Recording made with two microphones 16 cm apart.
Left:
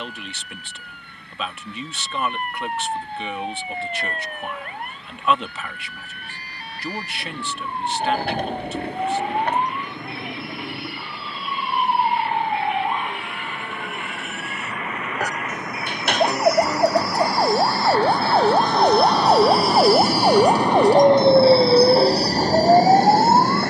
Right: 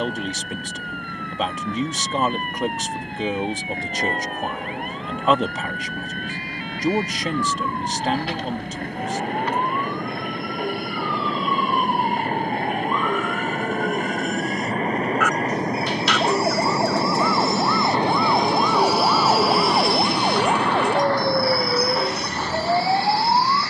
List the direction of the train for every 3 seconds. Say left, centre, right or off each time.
right, right, right, right, right, right, centre, left.